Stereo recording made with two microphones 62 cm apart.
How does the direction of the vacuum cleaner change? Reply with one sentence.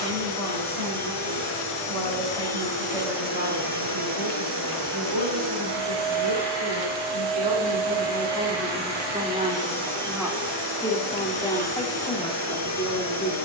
You can hear the vacuum cleaner stay in one place.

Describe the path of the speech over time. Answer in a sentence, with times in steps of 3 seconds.
In this clip you hear the speech on the right from 0 s and in the centre from 9 s.